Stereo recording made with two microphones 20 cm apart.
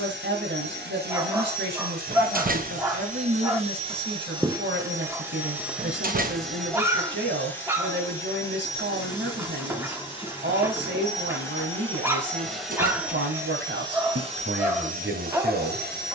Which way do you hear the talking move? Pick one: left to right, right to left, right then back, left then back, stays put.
stays put.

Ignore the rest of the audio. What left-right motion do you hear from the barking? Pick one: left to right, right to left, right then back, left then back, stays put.
stays put.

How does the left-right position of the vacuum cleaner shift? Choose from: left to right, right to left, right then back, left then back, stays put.
left then back.